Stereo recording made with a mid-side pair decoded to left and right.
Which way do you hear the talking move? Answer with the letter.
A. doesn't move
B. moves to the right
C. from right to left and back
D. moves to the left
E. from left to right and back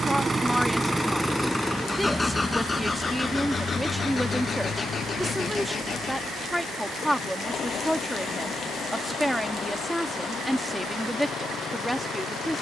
A.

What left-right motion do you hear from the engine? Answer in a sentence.
In this clip you hear the engine go from the right side to the left.